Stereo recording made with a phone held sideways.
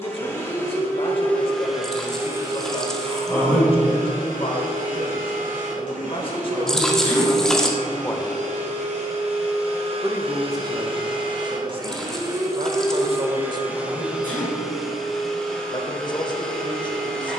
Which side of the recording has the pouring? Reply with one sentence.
You can hear the pouring in the centre.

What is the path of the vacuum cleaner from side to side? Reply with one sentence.
You can hear the vacuum cleaner move from left to right and back again.